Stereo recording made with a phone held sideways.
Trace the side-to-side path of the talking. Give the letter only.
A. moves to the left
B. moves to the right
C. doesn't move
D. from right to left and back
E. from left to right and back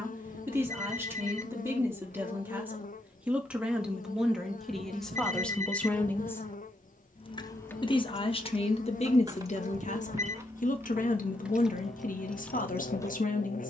A.